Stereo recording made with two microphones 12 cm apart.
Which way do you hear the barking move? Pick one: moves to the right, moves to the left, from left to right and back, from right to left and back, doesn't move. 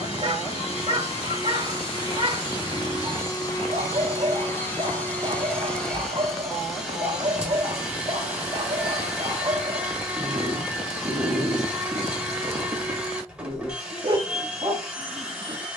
doesn't move.